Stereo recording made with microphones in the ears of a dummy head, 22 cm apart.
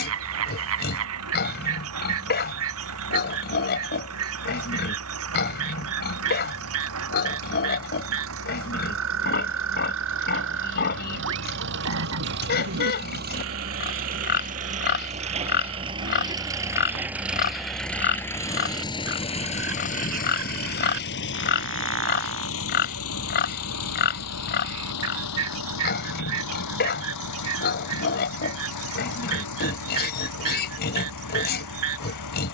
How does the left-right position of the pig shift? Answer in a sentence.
In this clip you hear the pig stay in one place.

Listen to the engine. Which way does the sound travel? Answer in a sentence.
In this clip you hear the engine move from right to left.